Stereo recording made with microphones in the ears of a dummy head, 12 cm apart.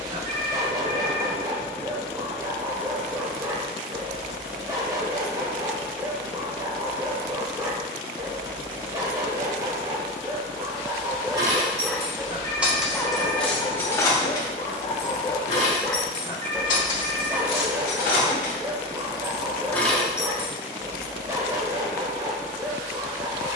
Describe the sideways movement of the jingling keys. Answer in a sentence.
You can hear the jingling keys move from right to left and back again.